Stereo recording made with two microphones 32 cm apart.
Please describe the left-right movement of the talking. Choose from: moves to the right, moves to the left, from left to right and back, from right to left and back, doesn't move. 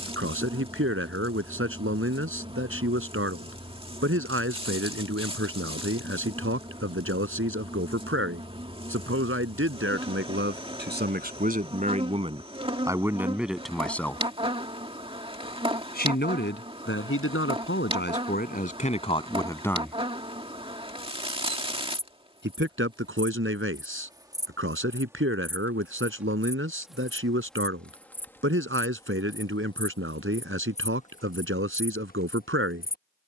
from right to left and back.